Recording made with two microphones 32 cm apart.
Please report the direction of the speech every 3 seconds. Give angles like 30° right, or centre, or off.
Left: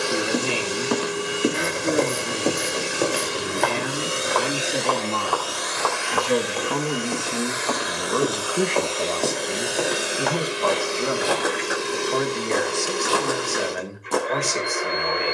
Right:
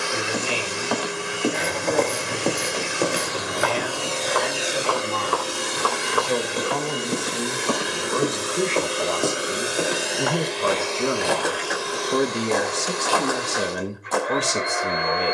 60° left, 50° left, 30° left, 10° right, 50° right.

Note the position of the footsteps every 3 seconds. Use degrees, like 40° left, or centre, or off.
20° left, 10° right, 20° right, centre, 30° left.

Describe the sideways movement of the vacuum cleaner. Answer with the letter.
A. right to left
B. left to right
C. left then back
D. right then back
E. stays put
D.